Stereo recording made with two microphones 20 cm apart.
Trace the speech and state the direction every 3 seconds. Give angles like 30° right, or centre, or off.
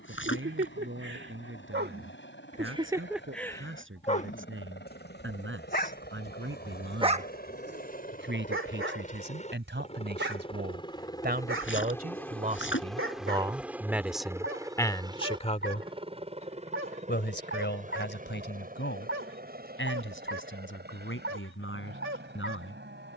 80° right, 70° right, 70° right, 60° right, 20° right, 40° left, 70° left, 80° left.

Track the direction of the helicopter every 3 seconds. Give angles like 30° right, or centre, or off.
70° left, 60° left, 50° left, 20° left, centre, 30° right, 50° right, 50° right.